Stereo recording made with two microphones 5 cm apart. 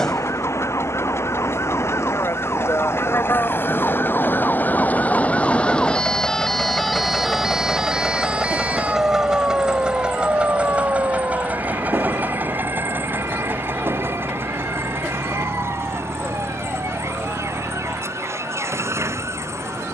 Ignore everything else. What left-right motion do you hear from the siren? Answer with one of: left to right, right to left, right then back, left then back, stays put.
left to right.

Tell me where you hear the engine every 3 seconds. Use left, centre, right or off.
left, left, centre, right, right, right, right.